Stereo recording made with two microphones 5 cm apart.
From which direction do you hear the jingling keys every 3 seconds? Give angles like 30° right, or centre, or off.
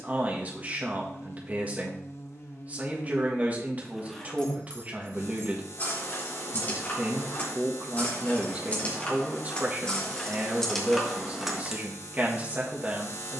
off, 20° left, 40° left, 10° left, off.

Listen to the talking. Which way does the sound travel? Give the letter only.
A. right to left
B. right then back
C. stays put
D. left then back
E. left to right
C.